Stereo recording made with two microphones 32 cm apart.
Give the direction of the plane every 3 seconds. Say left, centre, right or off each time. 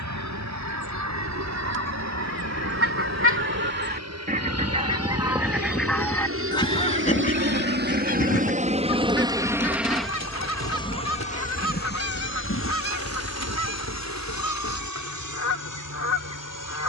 right, right, right, centre, left, left.